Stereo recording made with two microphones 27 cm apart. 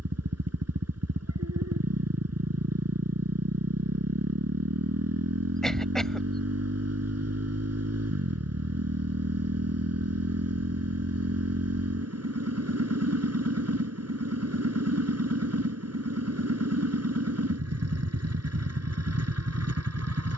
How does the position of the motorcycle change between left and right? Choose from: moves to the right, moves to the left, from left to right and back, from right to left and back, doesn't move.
doesn't move.